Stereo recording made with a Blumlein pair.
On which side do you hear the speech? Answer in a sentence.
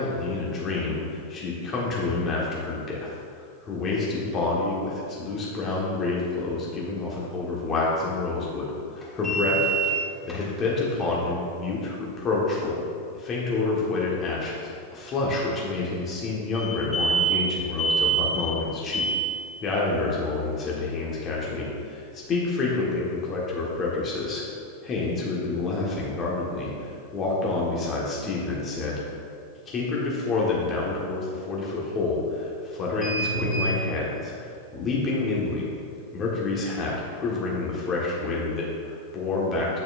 In this clip you hear the speech on the left.